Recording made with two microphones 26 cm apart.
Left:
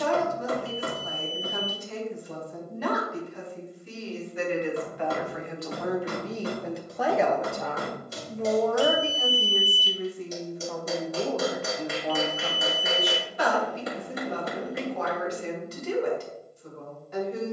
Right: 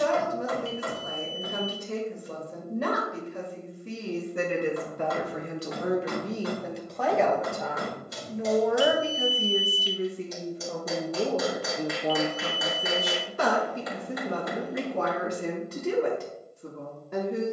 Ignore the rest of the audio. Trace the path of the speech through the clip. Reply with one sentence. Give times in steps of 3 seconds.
In this clip you hear the speech on the right from 0 s, in the centre from 6 s and on the right from 9 s.